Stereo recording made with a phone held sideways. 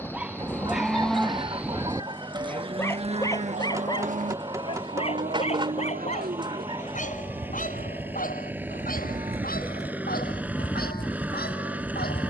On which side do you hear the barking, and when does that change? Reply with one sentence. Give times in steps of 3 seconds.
You can hear the barking in the centre from 0 s and on the left from 3 s.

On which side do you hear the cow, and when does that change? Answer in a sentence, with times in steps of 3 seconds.
In this clip you hear the cow in the centre from 0 s, on the right from 3 s and in the centre from 9 s.